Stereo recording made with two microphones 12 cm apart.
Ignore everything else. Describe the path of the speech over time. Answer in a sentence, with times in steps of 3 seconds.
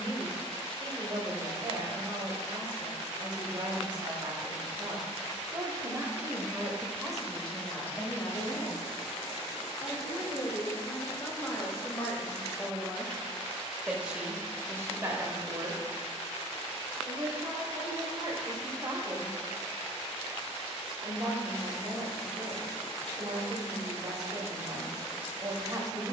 You can hear the speech on the right from 0 s, in the centre from 6 s, on the left from 9 s, in the centre from 12 s and on the right from 15 s.